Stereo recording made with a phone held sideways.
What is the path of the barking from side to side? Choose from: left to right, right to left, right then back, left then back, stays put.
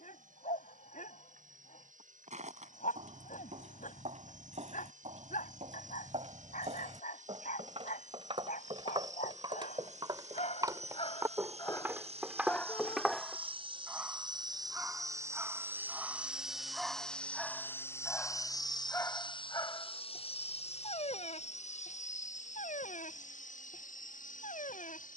right then back.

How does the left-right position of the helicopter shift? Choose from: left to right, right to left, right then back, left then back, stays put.
right to left.